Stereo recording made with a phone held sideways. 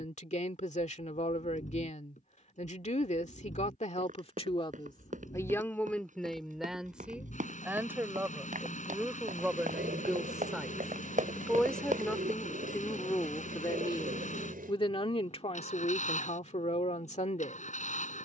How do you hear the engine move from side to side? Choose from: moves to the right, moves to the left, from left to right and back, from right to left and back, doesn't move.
doesn't move.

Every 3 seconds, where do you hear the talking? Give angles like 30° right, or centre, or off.
50° left, 40° left, 10° right, centre, 20° left, 50° left.